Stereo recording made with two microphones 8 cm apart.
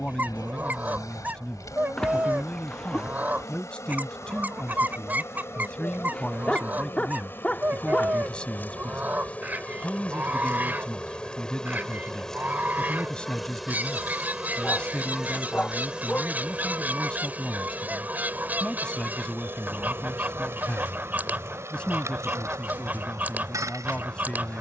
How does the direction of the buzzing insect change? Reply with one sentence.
In this clip you hear the buzzing insect go from the left side to the right.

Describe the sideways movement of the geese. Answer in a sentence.
In this clip you hear the geese stay in one place.